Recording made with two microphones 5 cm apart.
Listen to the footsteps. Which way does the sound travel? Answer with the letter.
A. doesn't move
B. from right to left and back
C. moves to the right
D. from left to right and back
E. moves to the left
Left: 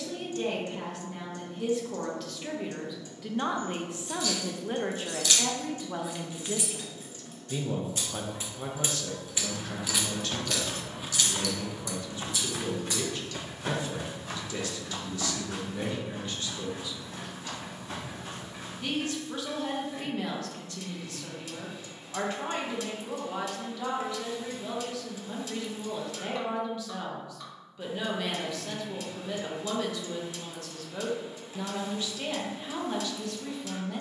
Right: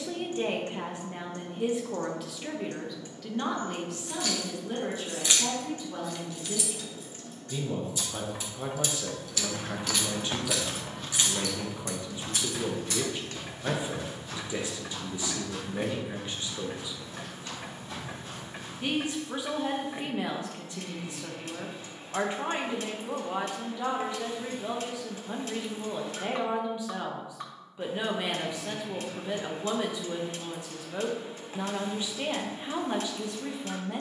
E.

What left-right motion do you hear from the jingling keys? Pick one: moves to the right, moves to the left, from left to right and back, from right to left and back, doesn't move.
from right to left and back.